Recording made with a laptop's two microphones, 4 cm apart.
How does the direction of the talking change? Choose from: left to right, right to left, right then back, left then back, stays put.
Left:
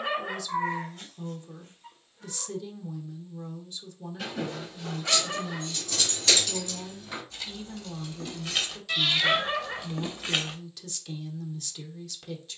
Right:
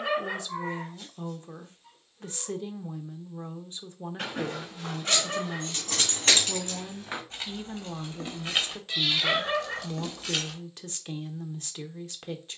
stays put.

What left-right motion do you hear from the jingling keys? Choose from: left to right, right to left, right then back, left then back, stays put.
right to left.